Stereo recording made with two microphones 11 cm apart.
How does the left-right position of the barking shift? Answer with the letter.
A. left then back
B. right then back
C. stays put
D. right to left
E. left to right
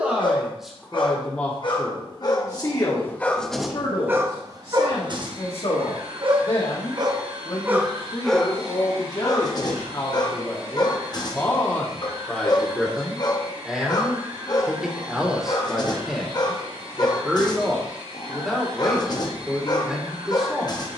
B.